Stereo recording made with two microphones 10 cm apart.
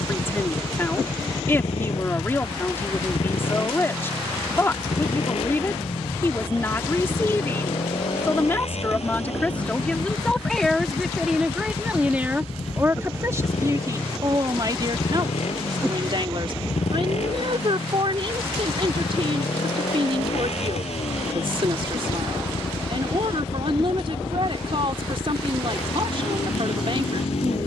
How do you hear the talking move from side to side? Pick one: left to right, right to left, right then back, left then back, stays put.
left to right.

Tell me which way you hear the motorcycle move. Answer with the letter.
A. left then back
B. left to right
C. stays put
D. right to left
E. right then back
C.